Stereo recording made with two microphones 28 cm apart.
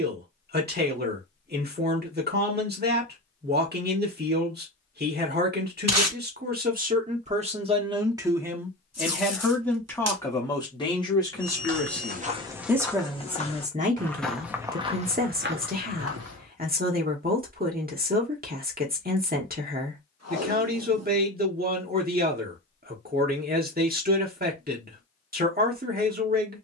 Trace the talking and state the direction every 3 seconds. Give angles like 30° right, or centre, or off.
40° right, 40° right, 20° right, 10° left, 20° right, 30° right, 30° right, 30° right, 30° right.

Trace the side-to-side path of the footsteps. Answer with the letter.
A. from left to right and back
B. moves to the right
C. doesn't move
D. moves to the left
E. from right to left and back
E.